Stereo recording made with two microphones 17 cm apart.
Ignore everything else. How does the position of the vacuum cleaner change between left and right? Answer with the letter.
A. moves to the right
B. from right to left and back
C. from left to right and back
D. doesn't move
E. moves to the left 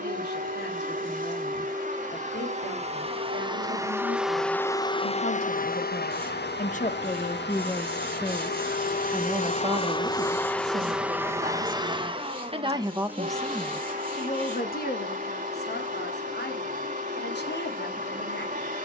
B.